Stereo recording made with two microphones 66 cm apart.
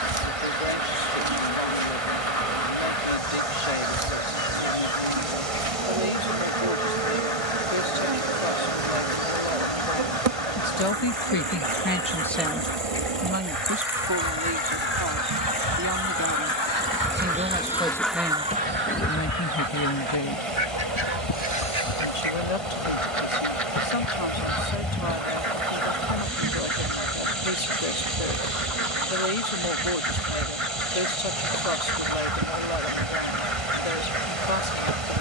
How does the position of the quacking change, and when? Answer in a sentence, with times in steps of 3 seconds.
In this clip you hear the quacking on the left from 0 s and on the right from 18 s.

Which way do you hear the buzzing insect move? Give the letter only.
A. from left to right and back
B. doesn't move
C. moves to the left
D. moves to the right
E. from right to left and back
E.